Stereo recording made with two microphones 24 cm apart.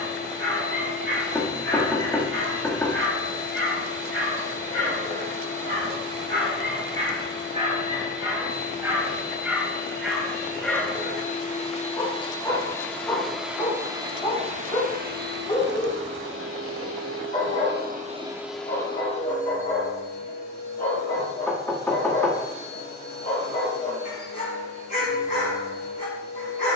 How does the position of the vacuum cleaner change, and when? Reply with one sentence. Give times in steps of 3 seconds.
You can hear the vacuum cleaner on the left from 0 s, in the centre from 12 s, on the right from 15 s and on the left from 18 s.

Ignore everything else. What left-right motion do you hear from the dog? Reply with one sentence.
In this clip you hear the dog travel towards the left.